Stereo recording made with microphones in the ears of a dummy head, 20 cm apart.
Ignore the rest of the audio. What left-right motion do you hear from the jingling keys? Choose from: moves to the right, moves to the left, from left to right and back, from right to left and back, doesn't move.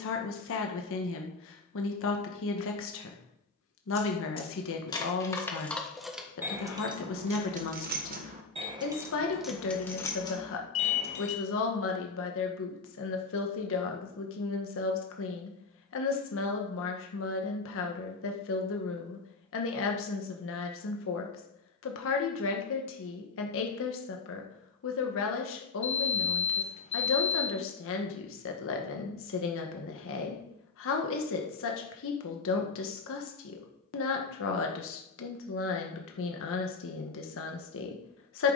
from left to right and back.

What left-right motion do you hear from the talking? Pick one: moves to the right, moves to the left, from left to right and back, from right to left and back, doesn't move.
doesn't move.